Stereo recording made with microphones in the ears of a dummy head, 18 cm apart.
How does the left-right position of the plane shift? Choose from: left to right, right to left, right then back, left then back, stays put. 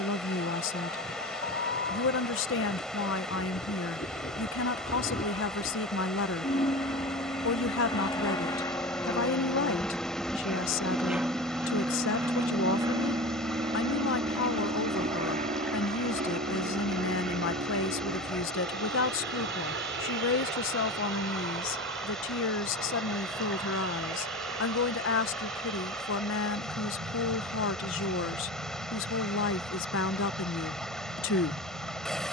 left to right.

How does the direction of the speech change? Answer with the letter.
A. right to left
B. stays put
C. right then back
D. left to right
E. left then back
B.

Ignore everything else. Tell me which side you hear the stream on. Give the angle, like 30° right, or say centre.
centre.